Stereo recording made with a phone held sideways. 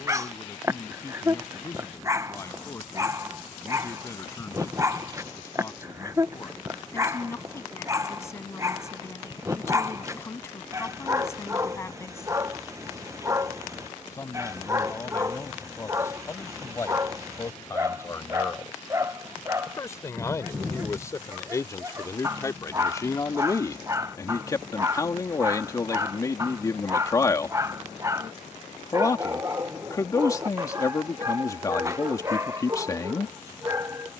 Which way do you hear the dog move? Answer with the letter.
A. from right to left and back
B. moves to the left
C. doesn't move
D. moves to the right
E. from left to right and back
C.